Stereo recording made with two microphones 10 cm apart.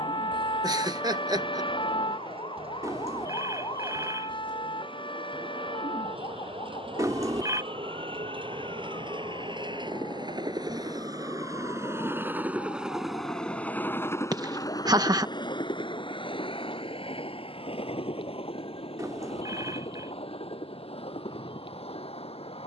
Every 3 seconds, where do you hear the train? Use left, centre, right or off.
right, right, right, right, centre, left, left, left.